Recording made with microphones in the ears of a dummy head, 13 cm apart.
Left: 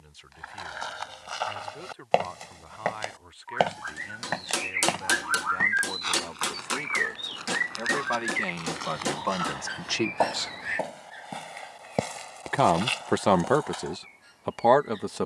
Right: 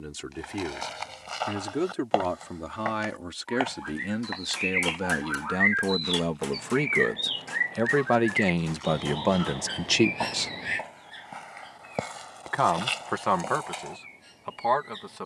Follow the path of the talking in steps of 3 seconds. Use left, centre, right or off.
right, right, right, right, left.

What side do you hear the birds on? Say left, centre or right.
right.